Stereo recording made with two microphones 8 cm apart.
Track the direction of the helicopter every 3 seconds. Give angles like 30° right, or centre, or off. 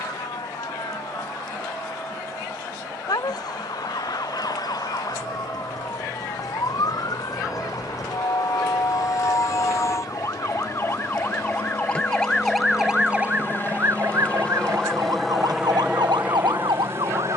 70° left, 70° left, 60° left, 50° left, 30° left, 20° right.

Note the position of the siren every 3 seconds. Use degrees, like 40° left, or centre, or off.
60° left, 60° left, 50° left, 30° left, 20° right, 70° right.